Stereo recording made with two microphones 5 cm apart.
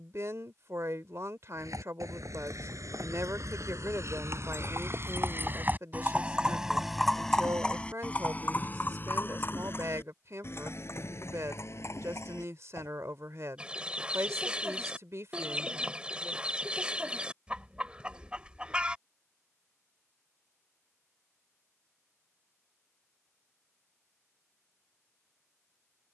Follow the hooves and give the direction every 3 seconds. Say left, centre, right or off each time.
right, right, centre, left, left, off, off, off, off.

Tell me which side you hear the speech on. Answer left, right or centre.
right.